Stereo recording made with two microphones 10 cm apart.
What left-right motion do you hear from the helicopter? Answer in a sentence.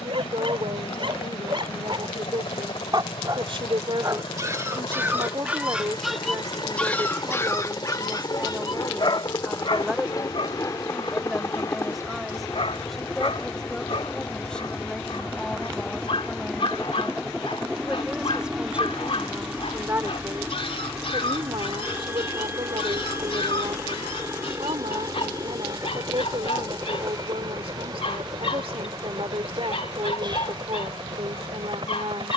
In this clip you hear the helicopter travel towards the right.